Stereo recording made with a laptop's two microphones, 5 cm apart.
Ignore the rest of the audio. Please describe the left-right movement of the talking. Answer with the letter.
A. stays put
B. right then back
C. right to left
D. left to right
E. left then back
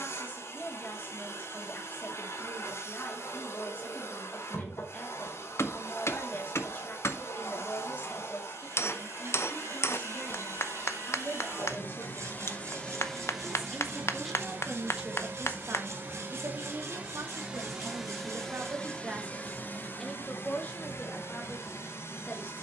B.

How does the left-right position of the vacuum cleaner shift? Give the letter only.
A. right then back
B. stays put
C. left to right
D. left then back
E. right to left
A.